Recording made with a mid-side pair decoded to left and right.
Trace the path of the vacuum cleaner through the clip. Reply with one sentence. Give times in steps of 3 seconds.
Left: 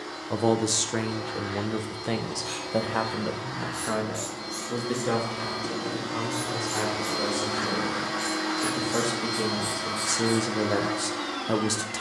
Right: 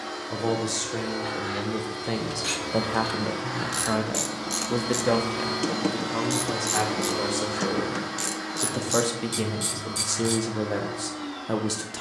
In this clip you hear the vacuum cleaner on the right from 0 s, in the centre from 6 s and on the left from 9 s.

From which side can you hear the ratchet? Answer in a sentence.
You can hear the ratchet on the right.